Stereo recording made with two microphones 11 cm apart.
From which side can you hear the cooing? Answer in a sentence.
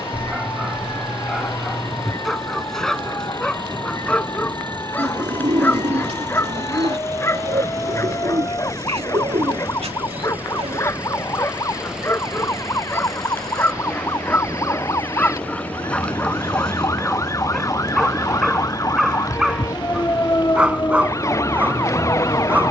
In this clip you hear the cooing on the right.